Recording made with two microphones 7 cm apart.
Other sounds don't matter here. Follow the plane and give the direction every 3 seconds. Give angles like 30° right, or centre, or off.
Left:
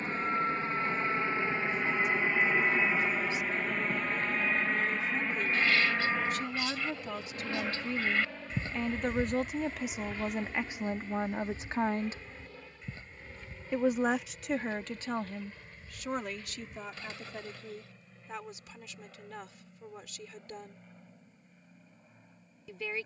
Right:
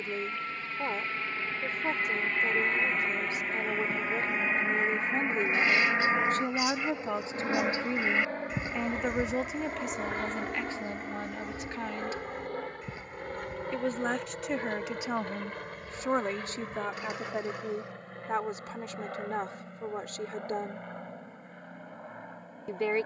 20° left, 10° right, 40° right, 50° right, 60° right, 60° right, 70° right, 70° right.